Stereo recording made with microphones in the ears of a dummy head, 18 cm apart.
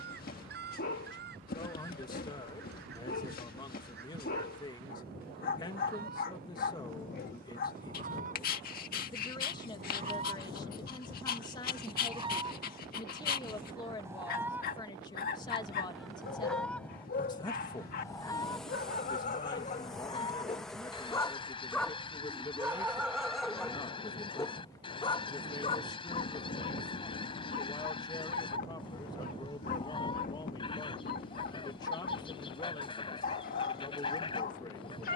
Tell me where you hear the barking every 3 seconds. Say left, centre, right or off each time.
left, left, left, left, left, left, left, centre, left, left, left, left.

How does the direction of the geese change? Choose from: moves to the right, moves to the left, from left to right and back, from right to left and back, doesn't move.
moves to the left.